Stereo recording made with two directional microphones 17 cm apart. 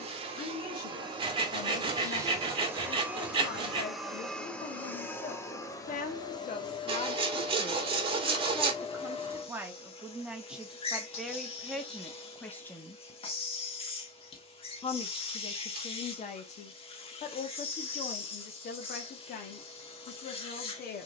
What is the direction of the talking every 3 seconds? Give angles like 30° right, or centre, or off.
70° left, 70° left, 30° left, centre, 10° left, 40° left, 60° left.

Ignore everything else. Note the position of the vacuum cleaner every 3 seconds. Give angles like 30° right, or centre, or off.
20° right, 10° left, 30° left, 30° left, 30° left, 30° left, 30° left.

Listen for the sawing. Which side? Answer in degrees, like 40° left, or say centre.
30° right.